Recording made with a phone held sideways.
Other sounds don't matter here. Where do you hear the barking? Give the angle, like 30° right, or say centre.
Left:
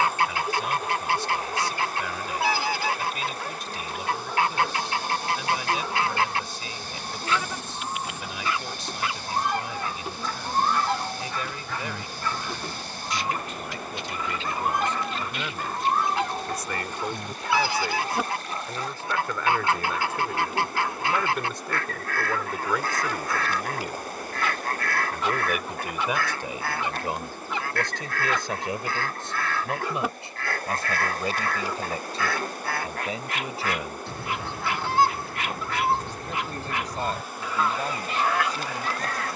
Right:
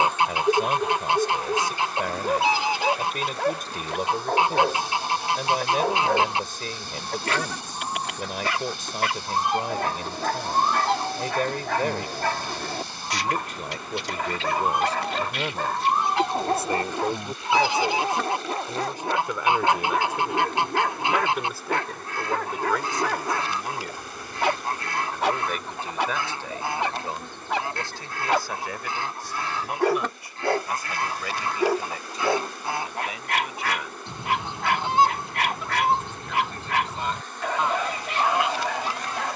70° right.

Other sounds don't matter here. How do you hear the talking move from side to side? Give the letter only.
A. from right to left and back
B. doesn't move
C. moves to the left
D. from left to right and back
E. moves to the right
C.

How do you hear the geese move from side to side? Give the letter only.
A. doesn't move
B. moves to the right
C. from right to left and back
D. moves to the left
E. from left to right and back
A.